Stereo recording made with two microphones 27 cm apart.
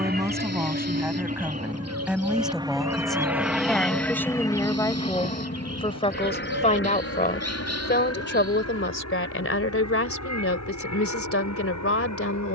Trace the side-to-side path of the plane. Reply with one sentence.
In this clip you hear the plane move from right to left.